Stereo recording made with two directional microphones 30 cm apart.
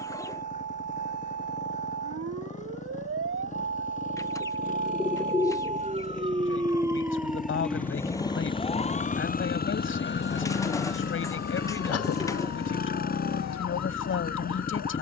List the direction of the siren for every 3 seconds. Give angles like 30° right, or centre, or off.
50° right, 40° right, centre, 40° left, 60° left.